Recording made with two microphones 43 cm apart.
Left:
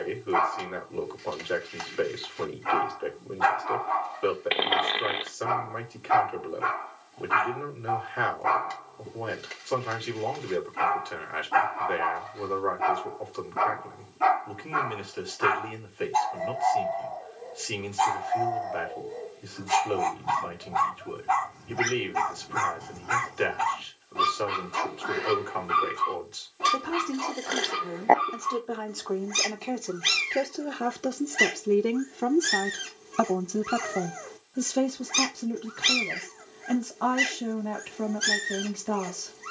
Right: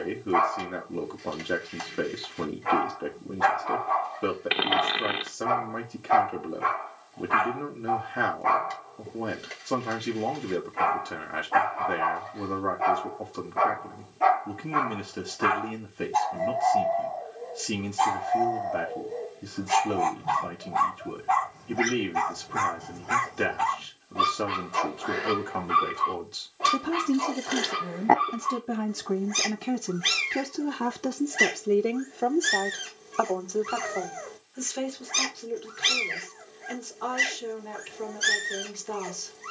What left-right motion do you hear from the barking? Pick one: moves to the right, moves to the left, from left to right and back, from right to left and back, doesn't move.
doesn't move.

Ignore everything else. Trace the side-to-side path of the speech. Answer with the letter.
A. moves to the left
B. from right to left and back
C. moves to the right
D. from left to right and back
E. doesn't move
A.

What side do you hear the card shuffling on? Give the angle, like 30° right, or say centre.
30° right.